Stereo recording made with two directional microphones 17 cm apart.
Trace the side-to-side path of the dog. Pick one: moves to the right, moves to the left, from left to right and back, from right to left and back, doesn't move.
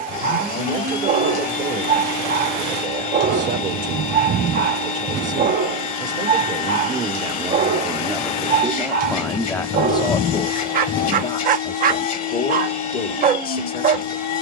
doesn't move.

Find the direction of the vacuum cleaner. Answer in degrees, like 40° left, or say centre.
50° left.